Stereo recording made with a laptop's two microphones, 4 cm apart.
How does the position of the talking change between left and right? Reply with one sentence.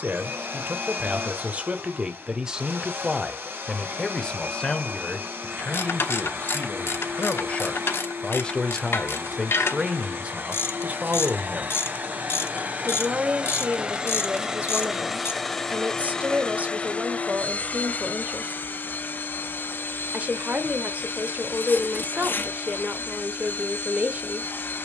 You can hear the talking move from right to left and back again.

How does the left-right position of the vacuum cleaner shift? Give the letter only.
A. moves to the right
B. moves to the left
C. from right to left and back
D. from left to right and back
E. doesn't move
B.